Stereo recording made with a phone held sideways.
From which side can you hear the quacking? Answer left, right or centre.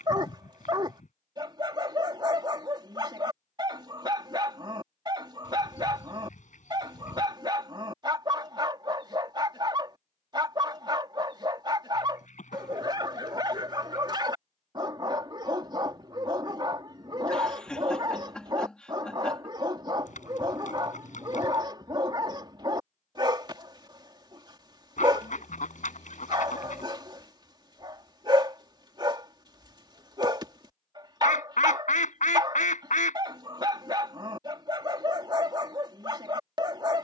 left.